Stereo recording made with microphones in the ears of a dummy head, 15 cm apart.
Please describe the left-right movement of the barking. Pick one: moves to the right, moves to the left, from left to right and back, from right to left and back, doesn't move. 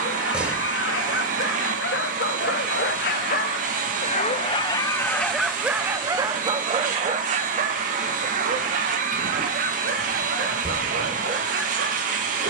moves to the right.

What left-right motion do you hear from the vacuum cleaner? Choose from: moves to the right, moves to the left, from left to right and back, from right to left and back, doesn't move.
doesn't move.